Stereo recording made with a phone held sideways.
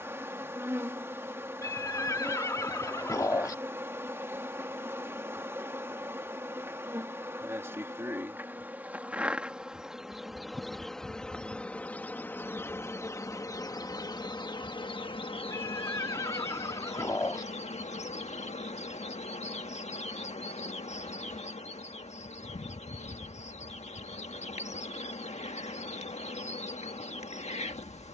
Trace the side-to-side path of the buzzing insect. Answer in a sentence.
You can hear the buzzing insect go from the right side to the left.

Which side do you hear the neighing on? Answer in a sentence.
You can hear the neighing on the left.